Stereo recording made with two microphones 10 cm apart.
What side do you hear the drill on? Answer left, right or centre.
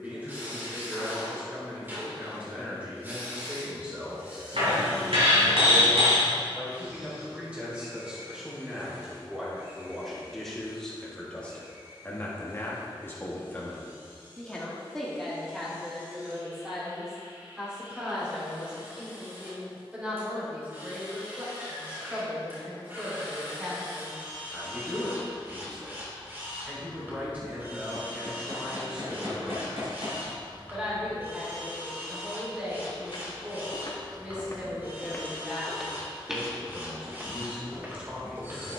right.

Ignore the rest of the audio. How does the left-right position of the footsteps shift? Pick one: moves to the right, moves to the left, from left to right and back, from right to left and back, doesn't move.
moves to the right.